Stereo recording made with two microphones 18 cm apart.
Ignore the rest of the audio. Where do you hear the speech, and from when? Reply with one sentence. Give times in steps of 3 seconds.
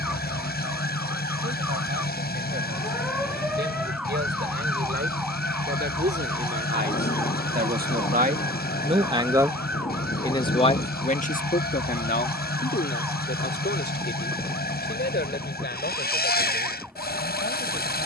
You can hear the speech on the right from 0 s and on the left from 9 s.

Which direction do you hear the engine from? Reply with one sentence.
You can hear the engine on the left.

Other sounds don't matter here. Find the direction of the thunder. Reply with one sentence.
In this clip you hear the thunder on the left.